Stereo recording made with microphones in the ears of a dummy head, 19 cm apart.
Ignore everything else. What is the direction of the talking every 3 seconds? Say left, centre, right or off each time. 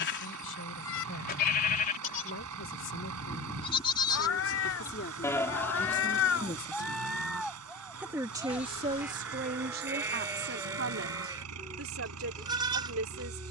left, left, centre, right, right.